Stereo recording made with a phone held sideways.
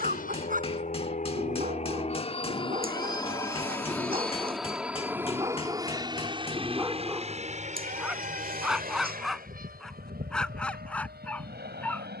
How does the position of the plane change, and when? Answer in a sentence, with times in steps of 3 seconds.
You can hear the plane on the left from 0 s, in the centre from 3 s and on the right from 6 s.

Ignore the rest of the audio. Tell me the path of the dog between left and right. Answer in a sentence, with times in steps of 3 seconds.
You can hear the dog on the right from 0 s and in the centre from 6 s.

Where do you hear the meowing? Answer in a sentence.
You can hear the meowing on the right.